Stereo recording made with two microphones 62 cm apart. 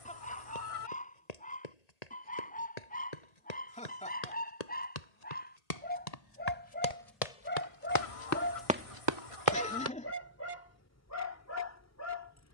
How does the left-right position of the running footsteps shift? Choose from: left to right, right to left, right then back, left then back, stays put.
left to right.